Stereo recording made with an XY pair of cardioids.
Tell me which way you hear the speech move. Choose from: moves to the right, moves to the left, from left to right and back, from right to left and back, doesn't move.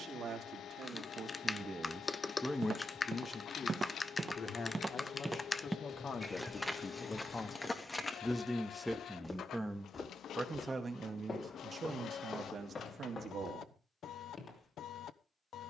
from right to left and back.